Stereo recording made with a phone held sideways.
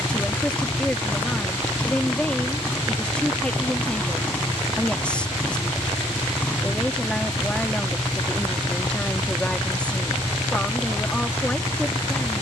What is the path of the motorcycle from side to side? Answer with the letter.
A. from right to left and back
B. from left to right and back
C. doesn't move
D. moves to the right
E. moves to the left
C.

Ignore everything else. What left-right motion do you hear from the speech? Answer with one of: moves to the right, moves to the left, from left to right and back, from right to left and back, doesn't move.
doesn't move.